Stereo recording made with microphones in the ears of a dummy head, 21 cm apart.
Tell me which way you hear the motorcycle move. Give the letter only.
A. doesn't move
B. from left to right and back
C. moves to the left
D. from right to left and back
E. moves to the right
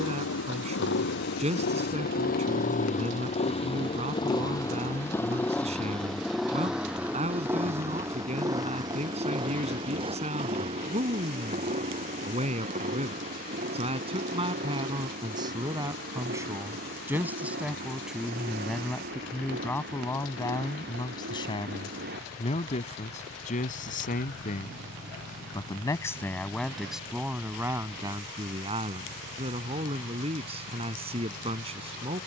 E.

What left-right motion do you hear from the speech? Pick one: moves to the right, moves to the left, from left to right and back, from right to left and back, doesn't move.
from right to left and back.